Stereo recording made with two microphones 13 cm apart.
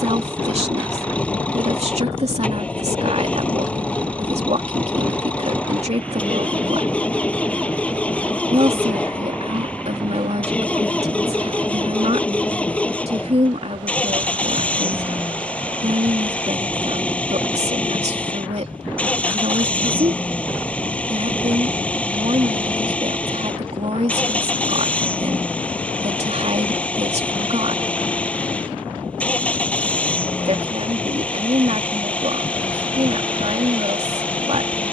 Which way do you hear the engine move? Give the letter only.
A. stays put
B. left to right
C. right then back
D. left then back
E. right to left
A.